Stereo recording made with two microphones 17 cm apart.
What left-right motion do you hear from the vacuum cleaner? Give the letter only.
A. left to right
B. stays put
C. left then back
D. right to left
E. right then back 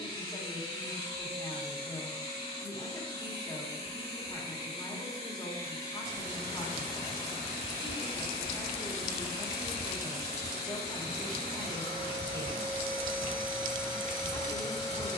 B.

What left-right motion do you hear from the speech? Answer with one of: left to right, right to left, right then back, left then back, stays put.
stays put.